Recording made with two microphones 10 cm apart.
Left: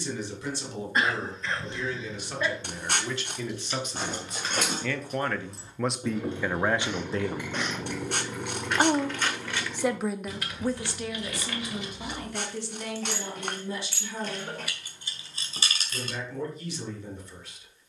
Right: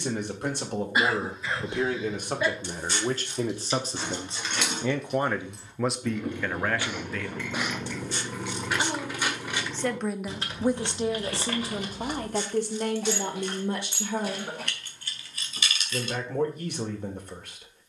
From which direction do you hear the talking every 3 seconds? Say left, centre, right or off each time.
right, right, left, centre, right, right.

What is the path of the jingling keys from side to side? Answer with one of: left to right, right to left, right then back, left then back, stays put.
right then back.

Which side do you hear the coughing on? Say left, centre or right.
centre.